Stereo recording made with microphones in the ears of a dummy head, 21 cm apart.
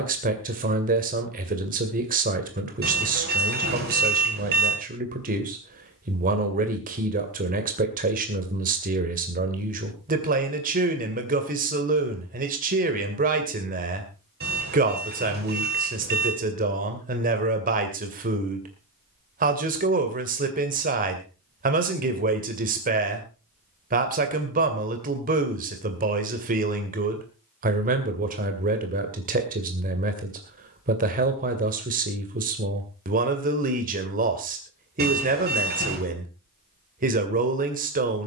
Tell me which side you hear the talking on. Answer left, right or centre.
right.